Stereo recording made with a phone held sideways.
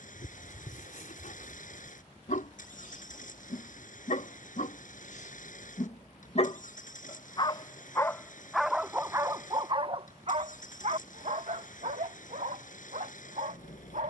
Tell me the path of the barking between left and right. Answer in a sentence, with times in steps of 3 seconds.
In this clip you hear the barking on the left from 0 s and on the right from 9 s.